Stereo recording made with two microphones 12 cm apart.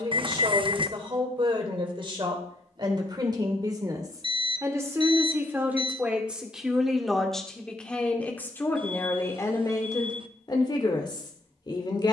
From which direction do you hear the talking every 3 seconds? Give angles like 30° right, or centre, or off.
40° right, 30° right, centre, 30° left.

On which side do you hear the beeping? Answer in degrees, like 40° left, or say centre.
50° right.